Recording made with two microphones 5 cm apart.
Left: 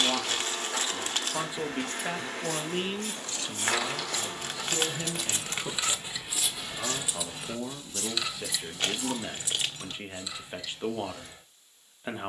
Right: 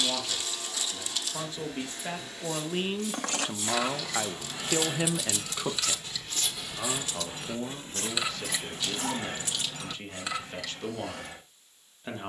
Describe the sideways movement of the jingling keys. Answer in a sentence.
In this clip you hear the jingling keys go left and come back.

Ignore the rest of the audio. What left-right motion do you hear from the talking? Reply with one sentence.
In this clip you hear the talking go right and come back.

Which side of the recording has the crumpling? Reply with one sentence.
In this clip you hear the crumpling on the left.